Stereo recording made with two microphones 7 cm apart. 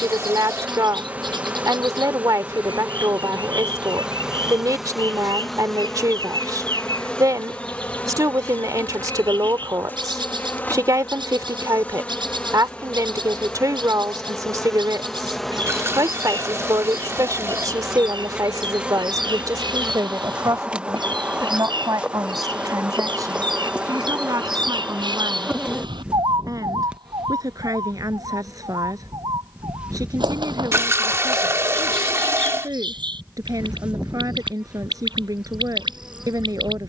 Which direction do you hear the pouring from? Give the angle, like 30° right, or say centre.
40° right.